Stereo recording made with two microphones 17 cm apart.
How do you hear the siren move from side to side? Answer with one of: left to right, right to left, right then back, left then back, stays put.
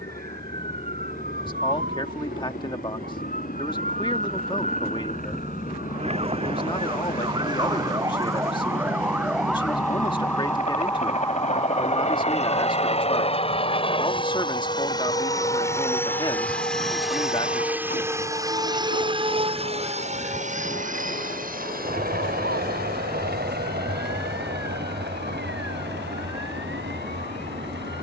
right to left.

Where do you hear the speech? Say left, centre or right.
left.